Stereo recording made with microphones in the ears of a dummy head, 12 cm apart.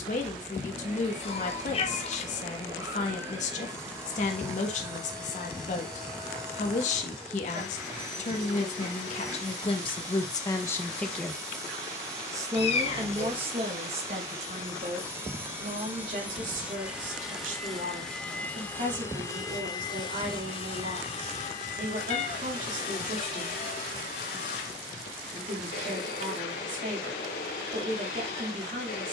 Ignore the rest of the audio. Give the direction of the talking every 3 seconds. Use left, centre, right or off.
left, left, left, left, right, right, right, right, right, right.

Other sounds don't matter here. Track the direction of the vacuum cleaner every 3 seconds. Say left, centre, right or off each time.
right, right, right, right, right, centre, left, left, left, left.